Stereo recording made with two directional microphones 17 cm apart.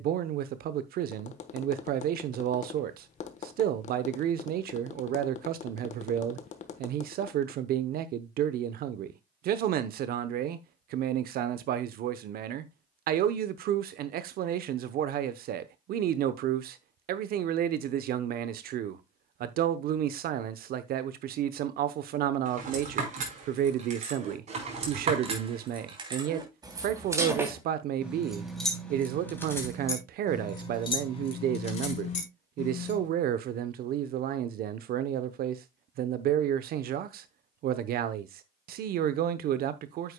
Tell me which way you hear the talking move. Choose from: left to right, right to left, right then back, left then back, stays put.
stays put.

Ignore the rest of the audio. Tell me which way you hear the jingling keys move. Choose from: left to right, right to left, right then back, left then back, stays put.
right to left.